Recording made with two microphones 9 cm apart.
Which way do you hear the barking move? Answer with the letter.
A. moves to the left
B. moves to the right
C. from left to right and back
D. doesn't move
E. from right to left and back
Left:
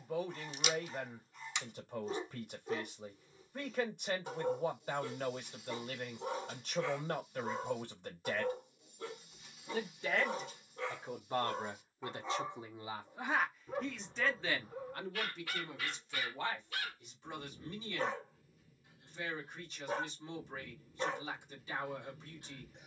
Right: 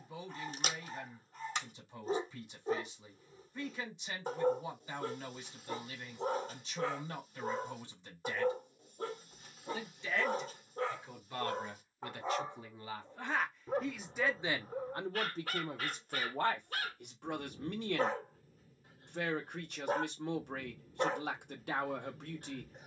D.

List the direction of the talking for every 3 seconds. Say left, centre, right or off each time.
left, left, left, left, centre, right, right, right.